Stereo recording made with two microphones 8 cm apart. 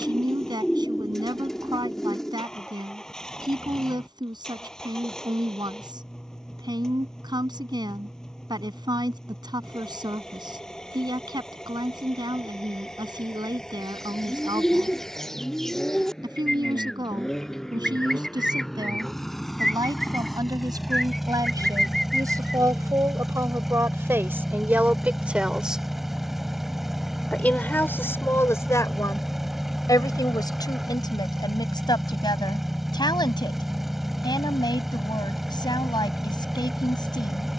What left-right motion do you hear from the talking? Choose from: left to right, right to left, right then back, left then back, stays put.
right to left.